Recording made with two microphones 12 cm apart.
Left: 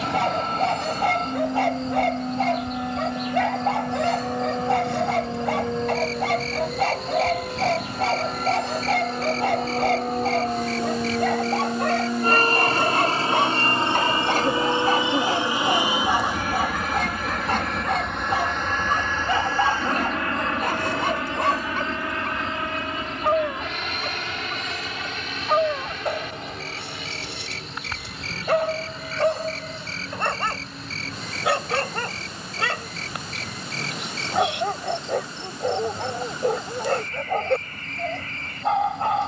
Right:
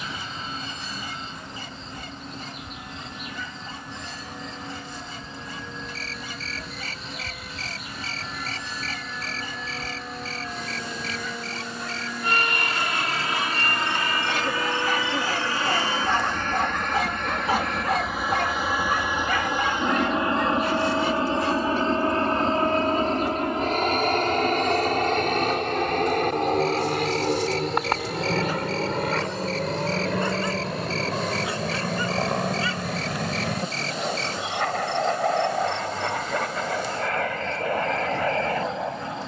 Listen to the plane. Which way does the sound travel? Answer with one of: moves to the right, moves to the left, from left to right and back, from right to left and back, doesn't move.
moves to the right.